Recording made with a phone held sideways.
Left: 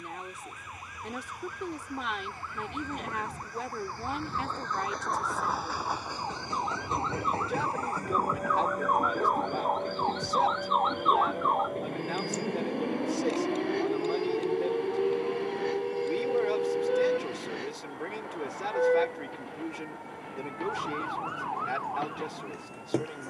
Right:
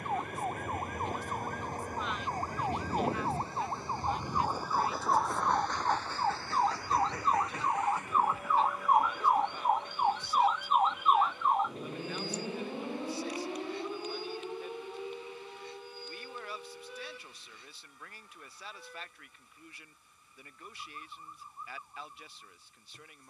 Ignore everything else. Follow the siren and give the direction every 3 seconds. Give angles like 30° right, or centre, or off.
50° right, 40° right, 30° right, 10° right, 30° left, 50° left, 70° left, 80° left.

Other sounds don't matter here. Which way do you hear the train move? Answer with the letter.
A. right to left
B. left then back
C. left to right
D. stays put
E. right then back
A.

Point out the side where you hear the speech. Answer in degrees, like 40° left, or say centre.
70° left.